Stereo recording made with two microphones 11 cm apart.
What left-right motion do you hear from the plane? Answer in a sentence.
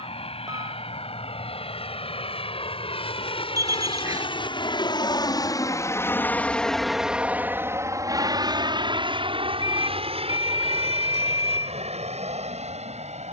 In this clip you hear the plane move to the right.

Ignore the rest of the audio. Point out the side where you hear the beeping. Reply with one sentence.
In this clip you hear the beeping on the right.